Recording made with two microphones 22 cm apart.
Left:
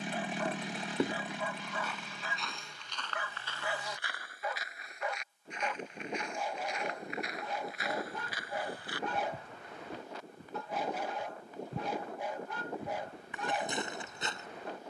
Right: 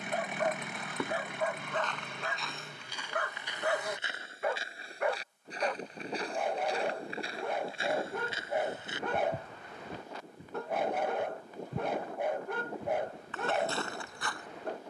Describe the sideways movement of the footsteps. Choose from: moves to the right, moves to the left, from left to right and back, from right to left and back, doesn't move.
from left to right and back.